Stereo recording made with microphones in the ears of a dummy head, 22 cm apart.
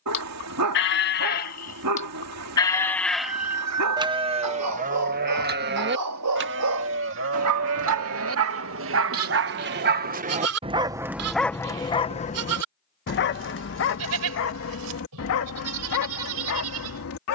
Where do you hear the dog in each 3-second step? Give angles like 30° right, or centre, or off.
80° right, 80° right, 70° right, 20° right, 50° left, 70° left.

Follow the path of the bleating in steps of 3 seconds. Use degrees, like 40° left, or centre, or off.
30° left, 30° right, 60° right, 70° right, 70° right, 70° right.